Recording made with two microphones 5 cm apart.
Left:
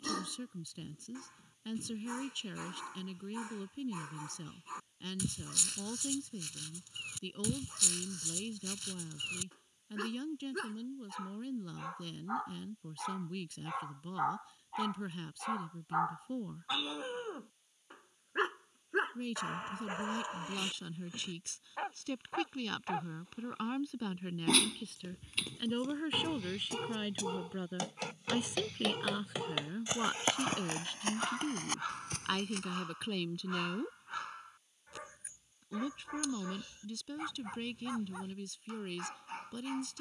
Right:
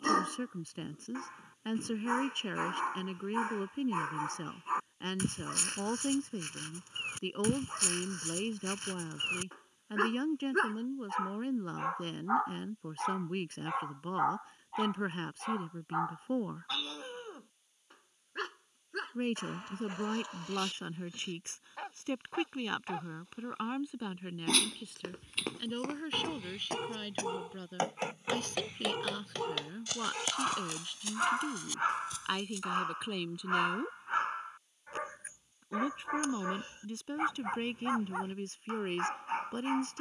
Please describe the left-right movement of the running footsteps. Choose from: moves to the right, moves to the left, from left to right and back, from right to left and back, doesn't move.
moves to the left.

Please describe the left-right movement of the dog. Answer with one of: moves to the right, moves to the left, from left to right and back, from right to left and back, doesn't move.
from right to left and back.